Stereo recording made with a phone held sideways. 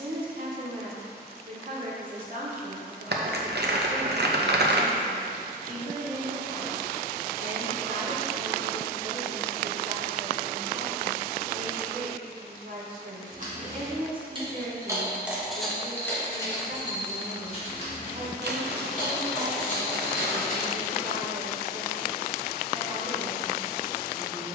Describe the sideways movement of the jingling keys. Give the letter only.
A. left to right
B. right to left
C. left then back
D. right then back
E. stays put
B.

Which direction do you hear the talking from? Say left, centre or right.
right.